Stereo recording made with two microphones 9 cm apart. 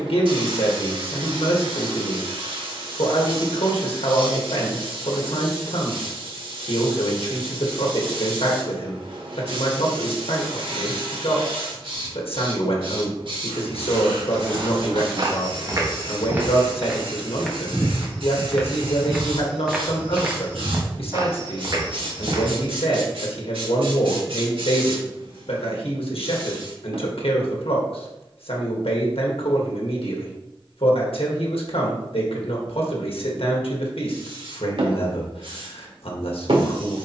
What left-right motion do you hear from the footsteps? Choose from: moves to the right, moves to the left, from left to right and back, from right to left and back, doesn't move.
from right to left and back.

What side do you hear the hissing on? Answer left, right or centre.
right.